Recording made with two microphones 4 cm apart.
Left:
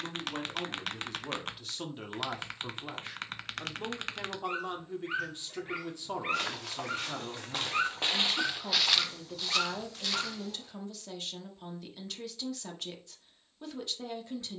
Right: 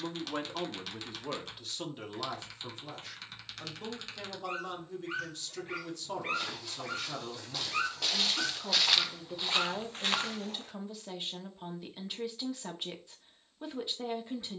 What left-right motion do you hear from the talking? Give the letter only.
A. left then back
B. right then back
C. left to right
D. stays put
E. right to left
A.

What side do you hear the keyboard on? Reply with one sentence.
In this clip you hear the keyboard on the left.